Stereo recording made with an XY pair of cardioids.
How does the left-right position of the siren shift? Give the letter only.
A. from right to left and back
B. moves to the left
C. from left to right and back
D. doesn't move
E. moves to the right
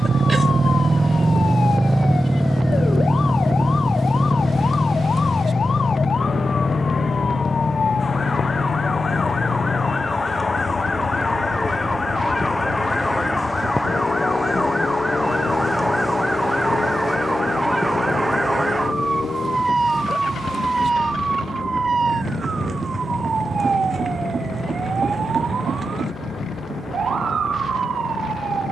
E.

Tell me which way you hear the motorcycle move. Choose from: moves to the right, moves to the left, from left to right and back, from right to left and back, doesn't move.
moves to the left.